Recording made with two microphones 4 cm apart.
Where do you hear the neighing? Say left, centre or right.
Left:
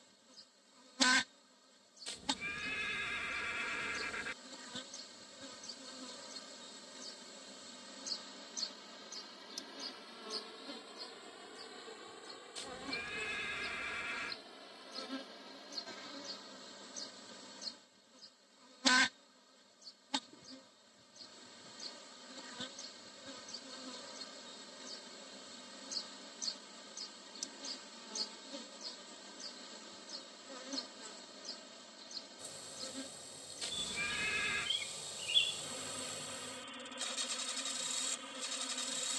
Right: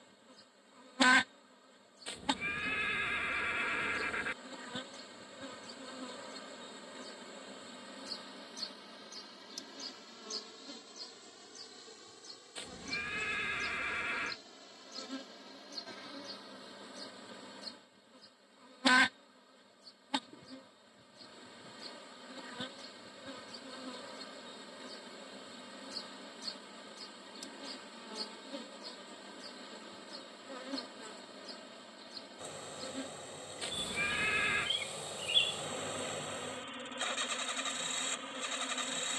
right.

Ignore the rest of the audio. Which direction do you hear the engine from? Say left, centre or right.
right.